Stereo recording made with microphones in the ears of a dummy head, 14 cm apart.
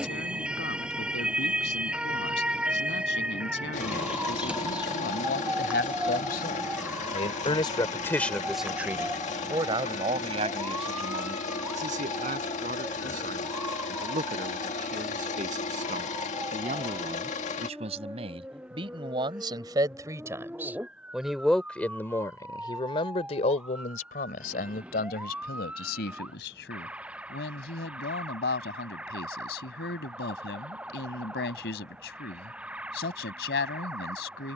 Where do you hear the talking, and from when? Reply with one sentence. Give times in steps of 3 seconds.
You can hear the talking on the left from 0 s, on the right from 9 s and on the left from 21 s.